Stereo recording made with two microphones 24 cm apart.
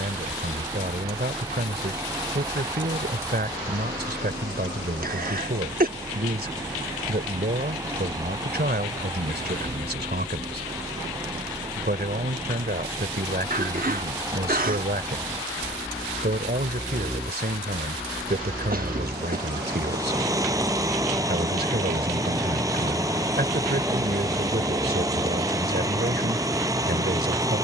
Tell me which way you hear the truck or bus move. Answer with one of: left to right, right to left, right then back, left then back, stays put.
stays put.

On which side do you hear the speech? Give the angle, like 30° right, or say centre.
40° right.